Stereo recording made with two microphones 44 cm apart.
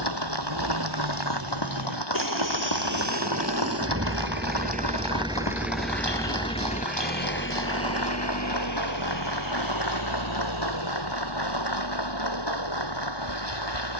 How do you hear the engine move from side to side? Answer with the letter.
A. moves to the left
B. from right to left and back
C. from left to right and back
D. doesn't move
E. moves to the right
A.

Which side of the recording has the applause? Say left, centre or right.
left.